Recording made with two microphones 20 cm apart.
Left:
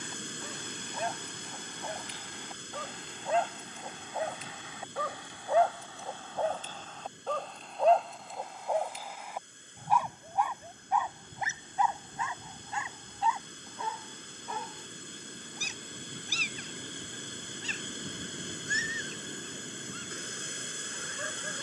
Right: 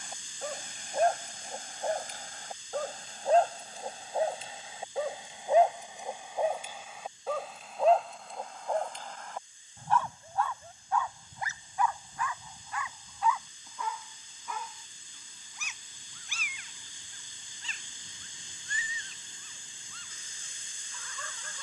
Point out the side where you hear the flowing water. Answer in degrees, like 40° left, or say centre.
70° left.